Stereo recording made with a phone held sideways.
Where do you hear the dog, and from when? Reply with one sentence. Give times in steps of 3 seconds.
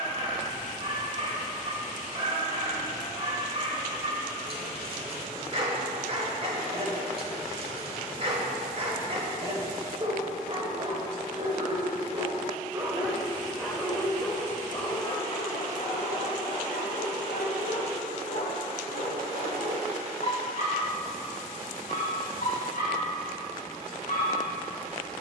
You can hear the dog on the right from 0 s, in the centre from 12 s and on the left from 15 s.